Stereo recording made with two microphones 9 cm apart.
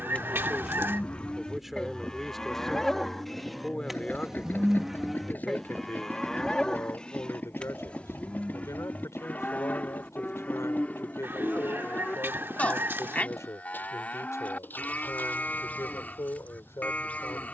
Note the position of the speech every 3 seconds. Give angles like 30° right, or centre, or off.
centre, 20° left, 30° left, 40° left, 40° left, 40° left.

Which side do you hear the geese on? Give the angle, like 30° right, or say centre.
30° right.